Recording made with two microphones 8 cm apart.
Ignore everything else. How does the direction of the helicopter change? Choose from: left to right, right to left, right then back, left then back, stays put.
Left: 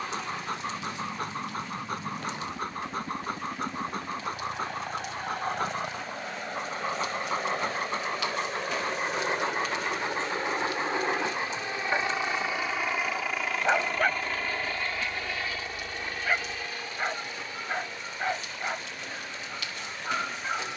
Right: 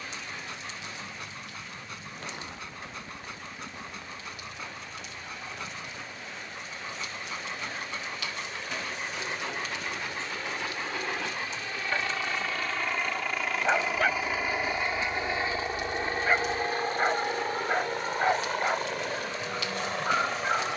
left to right.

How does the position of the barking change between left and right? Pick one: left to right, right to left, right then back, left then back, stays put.
left to right.